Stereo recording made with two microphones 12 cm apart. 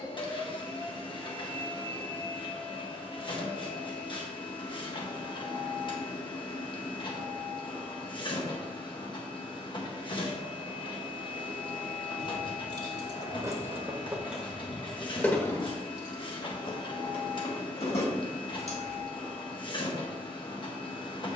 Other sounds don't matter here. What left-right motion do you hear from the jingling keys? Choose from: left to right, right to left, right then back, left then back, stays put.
right to left.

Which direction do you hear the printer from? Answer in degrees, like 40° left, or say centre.
40° left.